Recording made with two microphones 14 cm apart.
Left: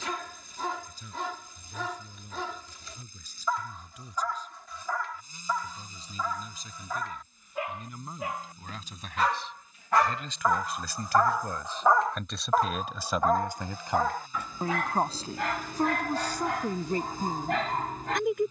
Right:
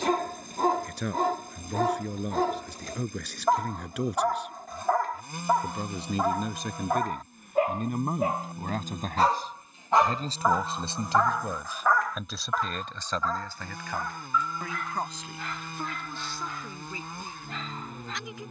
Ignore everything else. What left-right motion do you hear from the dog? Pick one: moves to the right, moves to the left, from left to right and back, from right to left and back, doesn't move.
moves to the left.